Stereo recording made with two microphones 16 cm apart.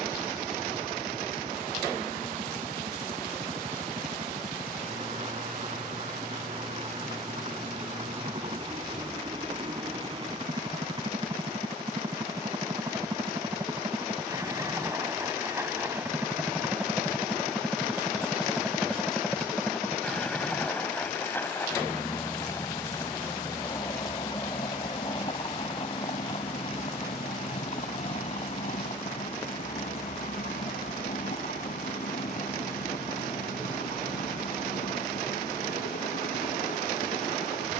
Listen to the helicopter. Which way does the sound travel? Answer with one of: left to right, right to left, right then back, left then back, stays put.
right to left.